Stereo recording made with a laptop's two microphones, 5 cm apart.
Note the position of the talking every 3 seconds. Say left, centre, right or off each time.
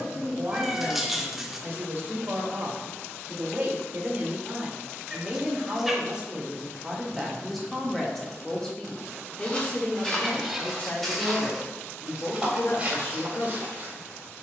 right, right, centre, left, left.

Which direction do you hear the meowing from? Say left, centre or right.
centre.